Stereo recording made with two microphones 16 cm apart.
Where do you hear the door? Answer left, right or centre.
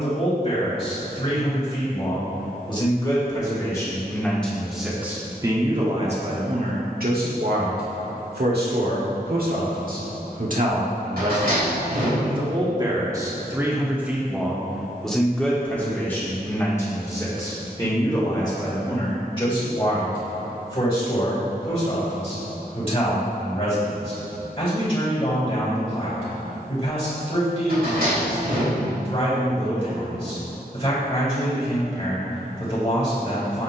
right.